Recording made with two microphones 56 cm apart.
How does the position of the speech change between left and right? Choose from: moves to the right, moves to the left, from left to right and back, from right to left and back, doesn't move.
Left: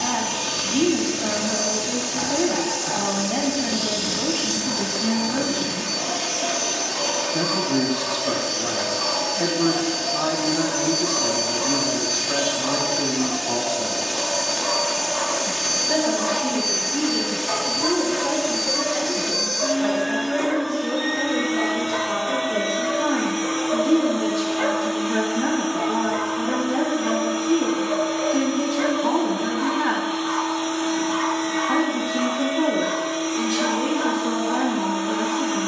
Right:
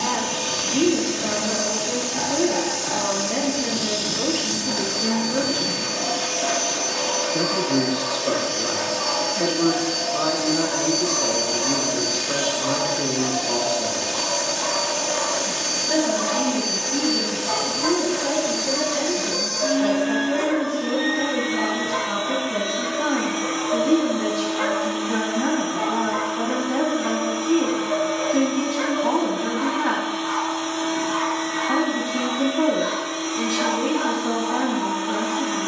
from left to right and back.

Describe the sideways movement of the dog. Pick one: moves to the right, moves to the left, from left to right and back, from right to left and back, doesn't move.
moves to the right.